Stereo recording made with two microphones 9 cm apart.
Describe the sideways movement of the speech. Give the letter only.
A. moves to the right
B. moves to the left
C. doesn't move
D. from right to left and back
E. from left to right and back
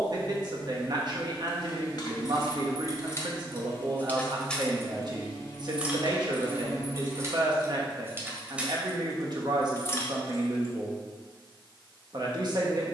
C.